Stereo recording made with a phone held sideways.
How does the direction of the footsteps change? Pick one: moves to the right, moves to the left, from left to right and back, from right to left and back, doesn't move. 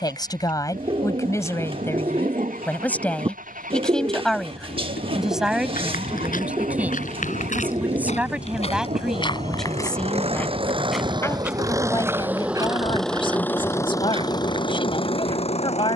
moves to the right.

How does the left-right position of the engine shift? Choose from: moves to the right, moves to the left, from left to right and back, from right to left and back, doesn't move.
moves to the left.